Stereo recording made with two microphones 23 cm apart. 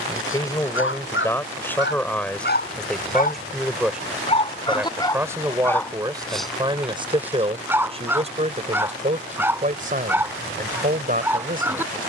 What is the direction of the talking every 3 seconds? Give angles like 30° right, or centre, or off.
10° left, 10° right, 20° right, 40° right.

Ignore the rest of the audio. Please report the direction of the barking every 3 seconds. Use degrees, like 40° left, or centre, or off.
50° left, 20° left, 10° right, 10° right.